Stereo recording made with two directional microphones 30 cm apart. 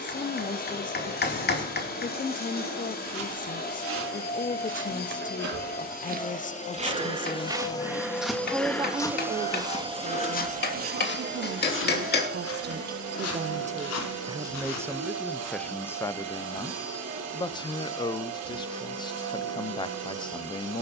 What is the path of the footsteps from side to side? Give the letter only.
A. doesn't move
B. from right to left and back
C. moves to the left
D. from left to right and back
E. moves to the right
C.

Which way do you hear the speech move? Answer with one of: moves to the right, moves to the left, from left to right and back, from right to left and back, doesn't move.
from left to right and back.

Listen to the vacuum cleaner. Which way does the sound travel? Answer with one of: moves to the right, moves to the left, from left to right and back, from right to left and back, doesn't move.
moves to the right.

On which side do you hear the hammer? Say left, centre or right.
left.